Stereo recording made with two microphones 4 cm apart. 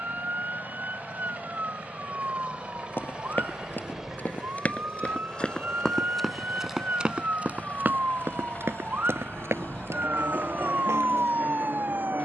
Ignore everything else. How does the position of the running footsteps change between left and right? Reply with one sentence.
In this clip you hear the running footsteps go from the left side to the right.